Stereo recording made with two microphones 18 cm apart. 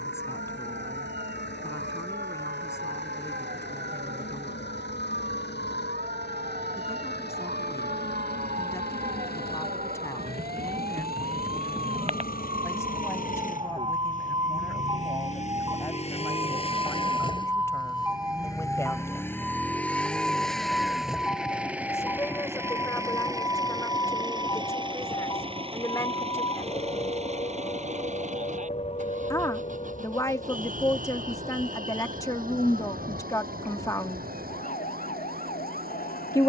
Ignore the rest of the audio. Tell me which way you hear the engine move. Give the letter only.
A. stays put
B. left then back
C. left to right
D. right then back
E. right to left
C.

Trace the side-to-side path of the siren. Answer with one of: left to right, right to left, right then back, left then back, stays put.
right to left.